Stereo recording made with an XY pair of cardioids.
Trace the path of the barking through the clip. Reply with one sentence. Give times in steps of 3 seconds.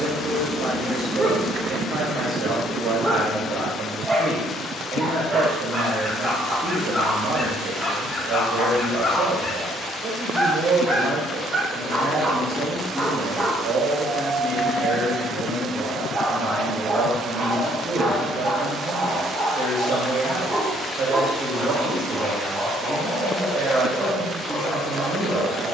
You can hear the barking on the right from 0 s, in the centre from 6 s and on the right from 12 s.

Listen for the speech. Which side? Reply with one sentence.
You can hear the speech on the right.